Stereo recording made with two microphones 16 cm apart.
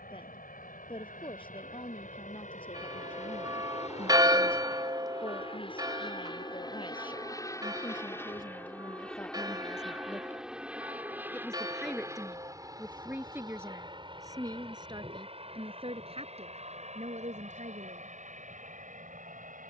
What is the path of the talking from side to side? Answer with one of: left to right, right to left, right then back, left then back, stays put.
left to right.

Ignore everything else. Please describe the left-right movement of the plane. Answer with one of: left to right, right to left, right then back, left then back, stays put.
left to right.